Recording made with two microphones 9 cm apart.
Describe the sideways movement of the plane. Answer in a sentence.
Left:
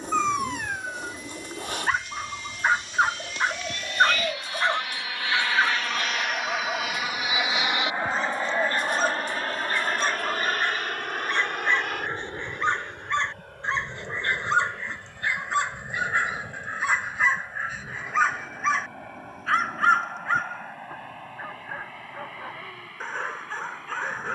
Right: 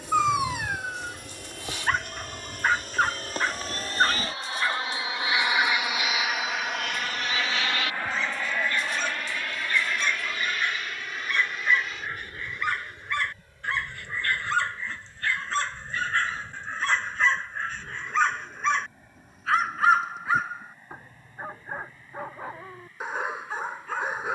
In this clip you hear the plane travel towards the left.